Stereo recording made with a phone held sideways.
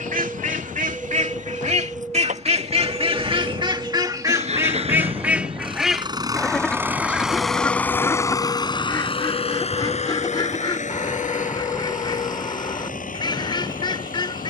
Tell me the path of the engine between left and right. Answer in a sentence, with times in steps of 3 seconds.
You can hear the engine on the right from 0 s, in the centre from 6 s and on the left from 9 s.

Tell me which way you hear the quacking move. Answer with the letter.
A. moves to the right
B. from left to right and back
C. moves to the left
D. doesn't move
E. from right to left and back
C.